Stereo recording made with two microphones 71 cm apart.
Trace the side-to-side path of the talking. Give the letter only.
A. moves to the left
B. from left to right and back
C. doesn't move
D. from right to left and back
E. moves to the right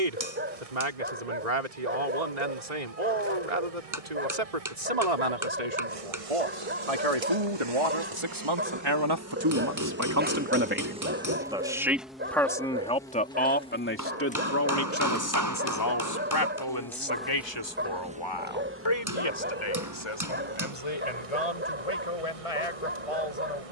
A.